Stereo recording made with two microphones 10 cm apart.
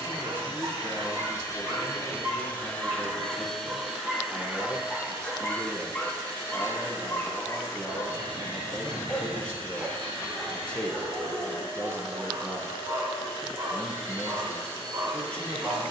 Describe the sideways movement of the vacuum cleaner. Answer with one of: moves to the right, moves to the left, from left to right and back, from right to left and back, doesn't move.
moves to the right.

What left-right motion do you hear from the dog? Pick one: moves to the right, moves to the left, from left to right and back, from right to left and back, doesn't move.
from right to left and back.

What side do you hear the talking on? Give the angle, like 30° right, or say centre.
10° left.